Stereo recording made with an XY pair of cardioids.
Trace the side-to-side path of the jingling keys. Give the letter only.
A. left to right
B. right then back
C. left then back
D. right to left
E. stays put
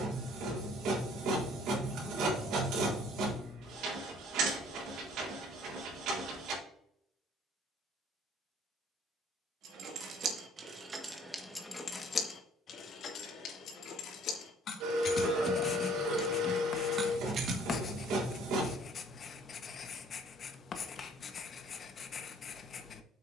C.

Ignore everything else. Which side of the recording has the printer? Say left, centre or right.
right.